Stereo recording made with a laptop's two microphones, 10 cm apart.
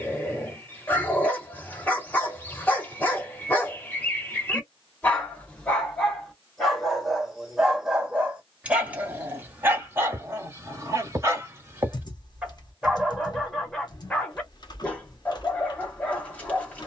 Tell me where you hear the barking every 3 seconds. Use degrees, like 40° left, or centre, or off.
20° left, 20° left, centre, 20° right, centre, 20° left.